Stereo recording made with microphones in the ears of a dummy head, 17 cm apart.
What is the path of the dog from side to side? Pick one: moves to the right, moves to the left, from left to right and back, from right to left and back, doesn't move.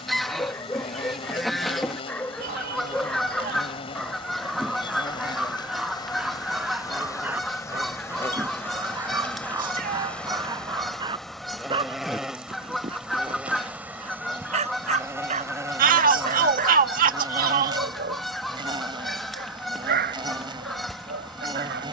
moves to the right.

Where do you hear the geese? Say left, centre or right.
centre.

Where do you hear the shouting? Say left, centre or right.
right.